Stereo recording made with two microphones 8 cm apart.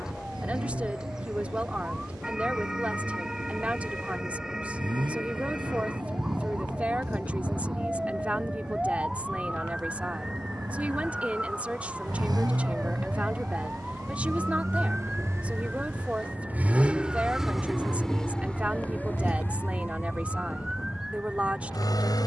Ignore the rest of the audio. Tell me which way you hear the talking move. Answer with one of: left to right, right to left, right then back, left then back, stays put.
stays put.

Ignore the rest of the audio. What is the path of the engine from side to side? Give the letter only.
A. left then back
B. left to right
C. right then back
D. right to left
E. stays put
D.